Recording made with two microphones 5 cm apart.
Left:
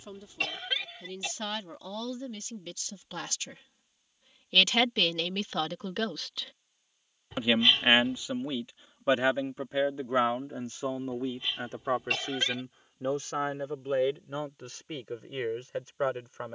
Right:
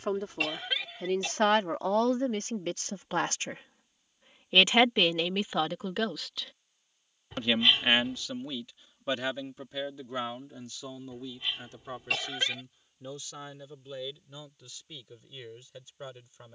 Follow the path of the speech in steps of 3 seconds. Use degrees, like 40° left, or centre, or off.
50° right, 20° right, 10° left, 40° left, 50° left, 50° left.